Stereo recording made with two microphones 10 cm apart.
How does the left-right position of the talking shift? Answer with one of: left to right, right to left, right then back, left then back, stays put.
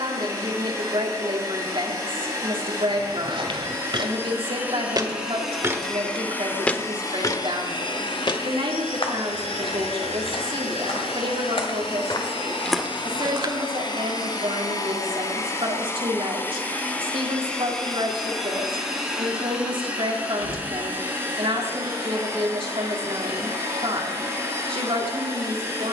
stays put.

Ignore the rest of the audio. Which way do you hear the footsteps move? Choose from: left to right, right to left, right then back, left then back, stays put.
left then back.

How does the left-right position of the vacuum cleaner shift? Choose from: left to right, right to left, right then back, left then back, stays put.
left then back.